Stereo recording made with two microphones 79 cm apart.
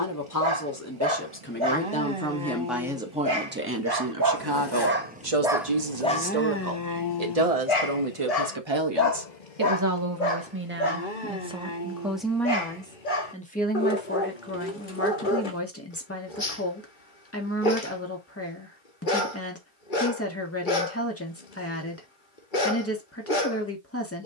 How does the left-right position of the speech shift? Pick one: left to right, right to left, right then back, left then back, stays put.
right then back.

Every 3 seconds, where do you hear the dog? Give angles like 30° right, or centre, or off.
40° right, 20° right, 30° left, 70° left, 70° left, 70° left, 70° left, 70° left.